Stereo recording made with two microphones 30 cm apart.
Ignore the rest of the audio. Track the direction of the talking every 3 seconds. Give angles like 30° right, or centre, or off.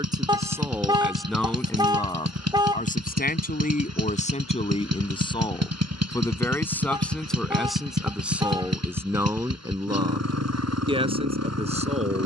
centre, 20° left, centre, 20° right.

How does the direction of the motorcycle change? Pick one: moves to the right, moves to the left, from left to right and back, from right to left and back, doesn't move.
doesn't move.